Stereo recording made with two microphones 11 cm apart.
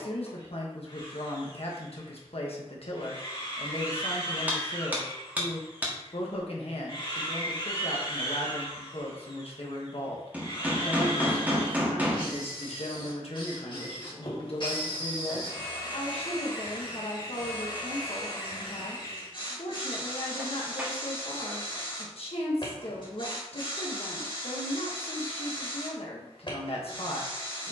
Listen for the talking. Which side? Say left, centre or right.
left.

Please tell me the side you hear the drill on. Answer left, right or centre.
left.